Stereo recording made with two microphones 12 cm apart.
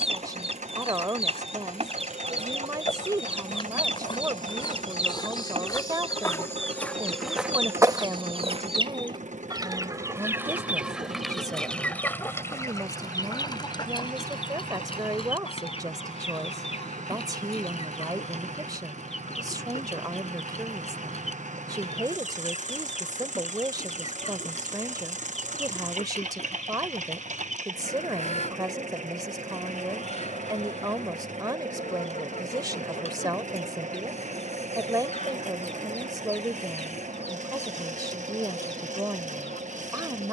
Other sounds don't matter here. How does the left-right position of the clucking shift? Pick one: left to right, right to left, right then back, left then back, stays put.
right to left.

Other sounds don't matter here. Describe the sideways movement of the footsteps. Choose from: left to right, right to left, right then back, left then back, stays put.
left to right.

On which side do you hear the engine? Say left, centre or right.
right.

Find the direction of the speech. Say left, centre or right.
right.